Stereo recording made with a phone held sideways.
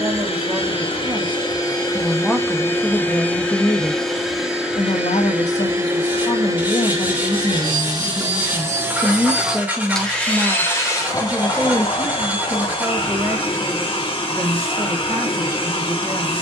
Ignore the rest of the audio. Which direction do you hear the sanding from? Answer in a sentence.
In this clip you hear the sanding in the centre.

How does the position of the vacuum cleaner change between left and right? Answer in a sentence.
You can hear the vacuum cleaner go right and come back.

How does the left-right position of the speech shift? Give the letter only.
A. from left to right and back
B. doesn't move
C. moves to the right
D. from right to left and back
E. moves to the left
D.